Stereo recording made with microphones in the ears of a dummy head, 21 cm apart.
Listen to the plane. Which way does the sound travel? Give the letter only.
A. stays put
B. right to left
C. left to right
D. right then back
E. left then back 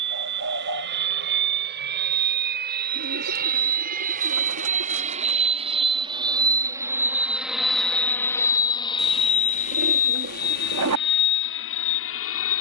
B.